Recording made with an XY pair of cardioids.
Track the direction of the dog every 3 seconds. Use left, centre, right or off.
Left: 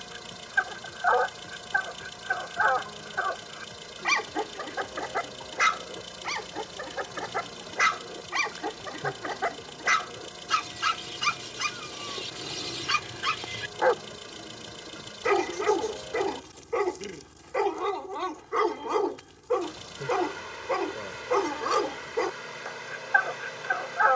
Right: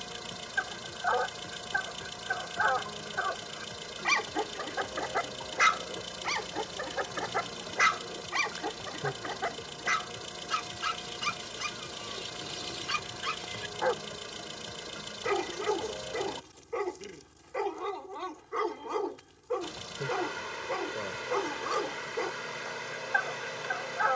left, centre, centre, left, left, left, left, left.